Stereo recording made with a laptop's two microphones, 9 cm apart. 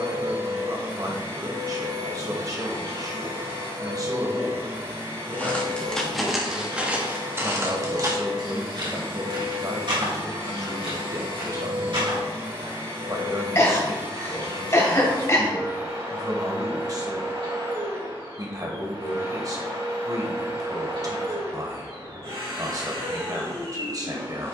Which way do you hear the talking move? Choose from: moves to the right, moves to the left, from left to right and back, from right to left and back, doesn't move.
doesn't move.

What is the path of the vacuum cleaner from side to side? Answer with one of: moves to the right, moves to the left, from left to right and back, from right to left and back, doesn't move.
doesn't move.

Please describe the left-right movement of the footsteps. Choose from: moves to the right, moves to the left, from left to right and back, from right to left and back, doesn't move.
moves to the right.